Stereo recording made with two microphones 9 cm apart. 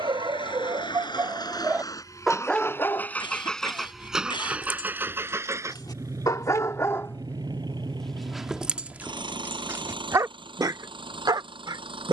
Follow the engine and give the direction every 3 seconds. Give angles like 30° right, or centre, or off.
40° left, 10° right, 50° right, 60° right.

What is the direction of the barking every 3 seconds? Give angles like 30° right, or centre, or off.
30° right, 50° left, 10° left, 30° right.